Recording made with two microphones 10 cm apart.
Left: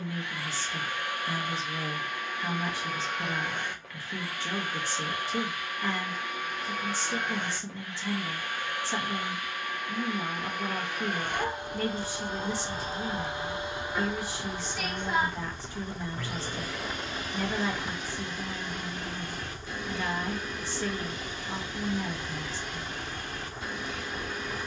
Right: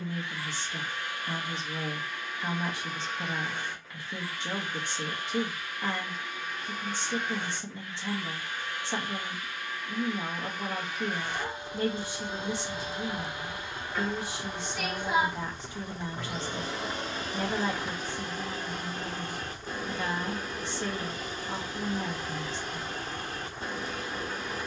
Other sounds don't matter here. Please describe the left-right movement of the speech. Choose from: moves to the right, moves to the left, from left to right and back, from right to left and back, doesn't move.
doesn't move.